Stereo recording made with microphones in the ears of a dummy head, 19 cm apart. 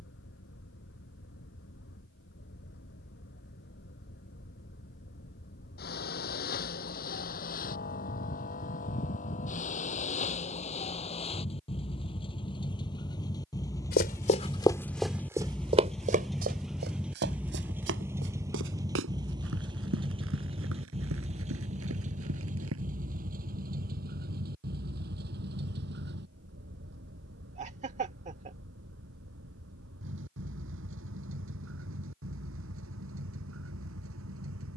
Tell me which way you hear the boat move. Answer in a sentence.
You can hear the boat move from left to right.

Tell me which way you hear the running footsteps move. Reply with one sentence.
You can hear the running footsteps move to the right.